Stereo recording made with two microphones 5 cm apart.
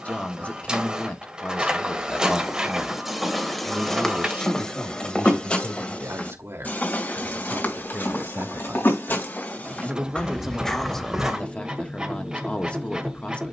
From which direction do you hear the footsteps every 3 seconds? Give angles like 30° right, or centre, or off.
10° right, 10° left, 40° left, 20° left, off.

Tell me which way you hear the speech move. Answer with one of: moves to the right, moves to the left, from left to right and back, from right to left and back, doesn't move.
from left to right and back.